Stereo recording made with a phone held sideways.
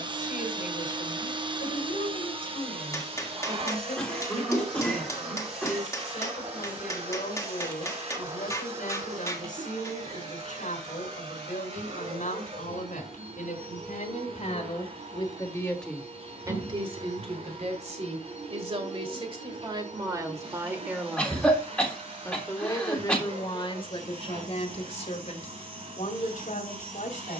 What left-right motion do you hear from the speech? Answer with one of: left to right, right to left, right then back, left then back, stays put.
right then back.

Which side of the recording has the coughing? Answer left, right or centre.
centre.